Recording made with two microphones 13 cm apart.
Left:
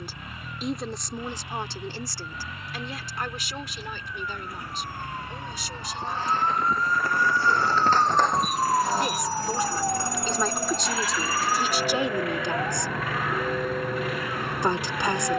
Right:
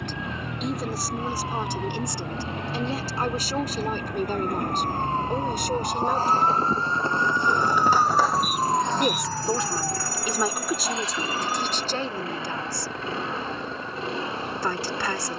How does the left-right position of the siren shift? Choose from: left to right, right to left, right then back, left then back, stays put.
right to left.